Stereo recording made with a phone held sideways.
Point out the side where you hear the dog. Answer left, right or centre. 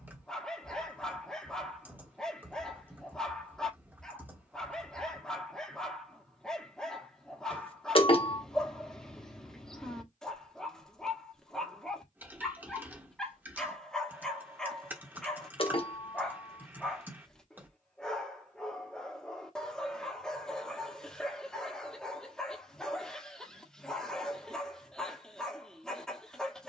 centre.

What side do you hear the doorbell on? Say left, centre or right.
left.